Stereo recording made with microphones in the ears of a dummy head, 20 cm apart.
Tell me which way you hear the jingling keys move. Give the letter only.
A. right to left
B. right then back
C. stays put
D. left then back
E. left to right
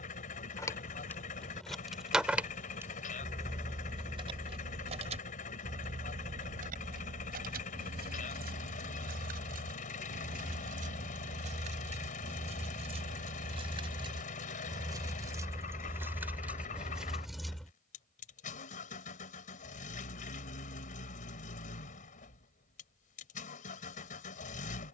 B.